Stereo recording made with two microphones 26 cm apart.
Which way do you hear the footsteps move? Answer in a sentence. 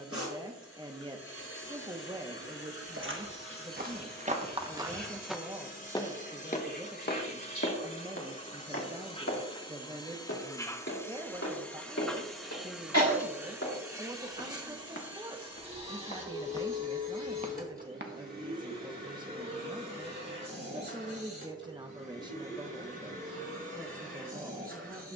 In this clip you hear the footsteps go left and come back.